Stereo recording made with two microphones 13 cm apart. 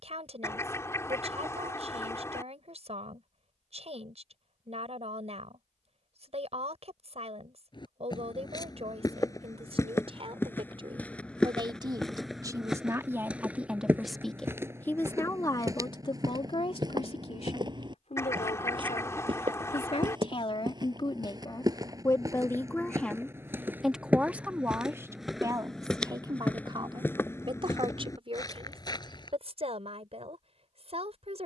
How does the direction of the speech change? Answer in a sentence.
You can hear the speech go left and come back.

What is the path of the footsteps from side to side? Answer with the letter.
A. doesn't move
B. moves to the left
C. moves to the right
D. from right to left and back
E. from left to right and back
E.